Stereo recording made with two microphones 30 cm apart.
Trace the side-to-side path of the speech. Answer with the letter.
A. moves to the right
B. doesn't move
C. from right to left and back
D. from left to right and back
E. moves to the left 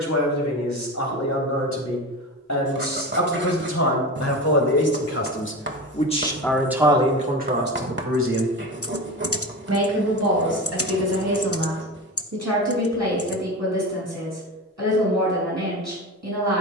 A.